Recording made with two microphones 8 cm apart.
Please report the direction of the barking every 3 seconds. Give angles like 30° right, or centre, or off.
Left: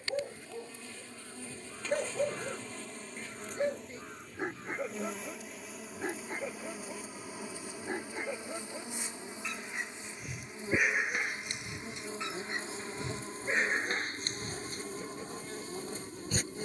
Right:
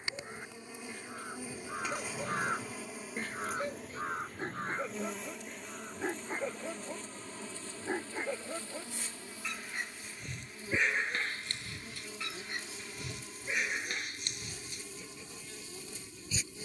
50° left, 10° left, 10° right, 10° left, 30° left, 50° left.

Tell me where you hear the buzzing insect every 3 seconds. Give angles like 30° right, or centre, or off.
10° right, centre, 10° left, 30° left, 40° left, 40° left.